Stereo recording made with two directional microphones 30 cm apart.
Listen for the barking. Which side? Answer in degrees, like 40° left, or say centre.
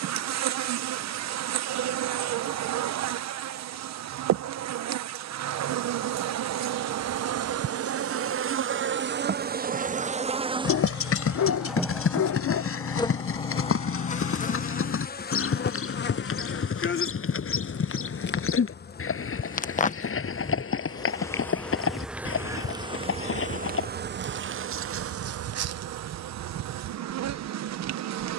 70° left.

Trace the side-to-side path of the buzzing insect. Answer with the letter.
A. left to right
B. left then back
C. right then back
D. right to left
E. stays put
B.